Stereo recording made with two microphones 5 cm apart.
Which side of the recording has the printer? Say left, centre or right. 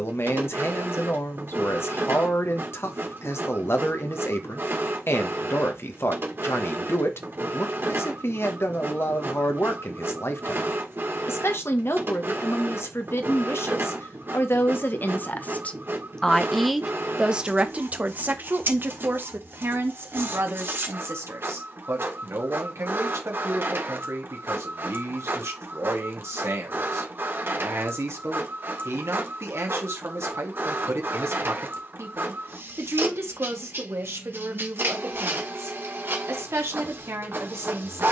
right.